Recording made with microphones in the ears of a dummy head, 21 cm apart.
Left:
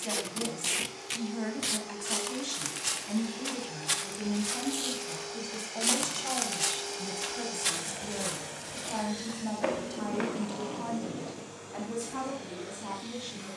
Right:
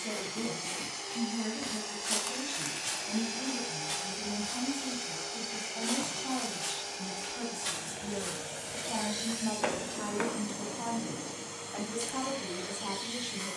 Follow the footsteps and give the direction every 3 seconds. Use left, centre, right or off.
centre, left, left, centre, off.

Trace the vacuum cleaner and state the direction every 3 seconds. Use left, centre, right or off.
right, right, centre, right, right.